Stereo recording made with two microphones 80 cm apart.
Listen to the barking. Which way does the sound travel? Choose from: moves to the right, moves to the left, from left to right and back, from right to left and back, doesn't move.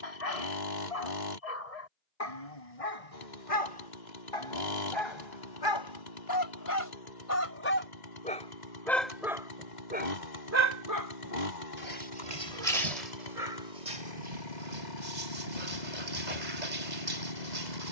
moves to the right.